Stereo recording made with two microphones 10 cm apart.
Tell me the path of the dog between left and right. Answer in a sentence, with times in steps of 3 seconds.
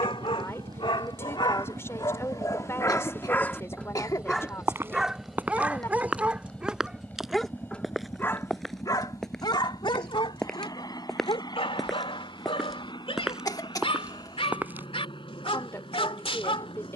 You can hear the dog on the left from 0 s, in the centre from 3 s and on the left from 9 s.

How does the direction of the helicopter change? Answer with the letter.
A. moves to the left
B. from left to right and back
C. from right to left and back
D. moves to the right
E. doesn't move
A.